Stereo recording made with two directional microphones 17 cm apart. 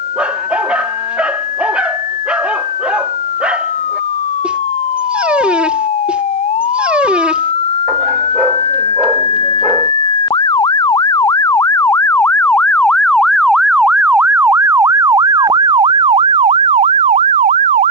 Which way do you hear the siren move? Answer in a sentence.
In this clip you hear the siren move to the right.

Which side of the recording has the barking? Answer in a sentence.
In this clip you hear the barking in the centre.